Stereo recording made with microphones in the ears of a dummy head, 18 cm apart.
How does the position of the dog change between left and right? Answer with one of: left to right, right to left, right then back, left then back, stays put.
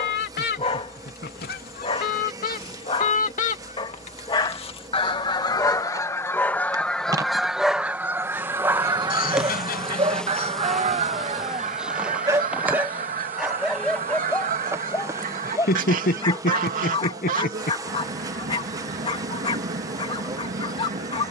right then back.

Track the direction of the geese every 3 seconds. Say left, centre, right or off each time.
left, left, centre, right, right, right, right.